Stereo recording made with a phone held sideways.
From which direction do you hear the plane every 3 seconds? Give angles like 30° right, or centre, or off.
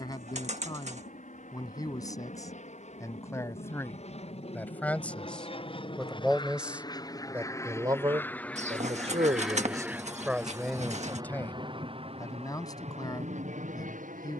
50° left, 40° left, 20° left, 20° right, 40° right.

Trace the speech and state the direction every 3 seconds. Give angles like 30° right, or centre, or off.
20° left, 10° left, 20° right, 10° right, 20° left.